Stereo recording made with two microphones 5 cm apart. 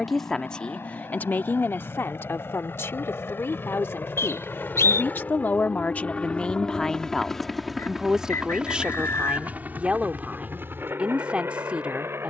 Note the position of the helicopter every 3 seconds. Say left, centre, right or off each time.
left, left, centre, right.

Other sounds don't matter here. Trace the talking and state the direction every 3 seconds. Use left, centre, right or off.
left, left, centre, right.